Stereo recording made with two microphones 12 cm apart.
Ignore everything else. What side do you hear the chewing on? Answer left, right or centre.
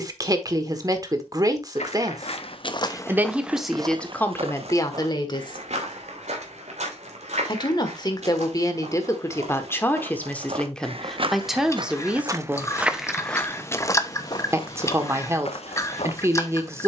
left.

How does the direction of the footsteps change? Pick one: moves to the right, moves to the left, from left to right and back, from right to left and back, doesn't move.
from left to right and back.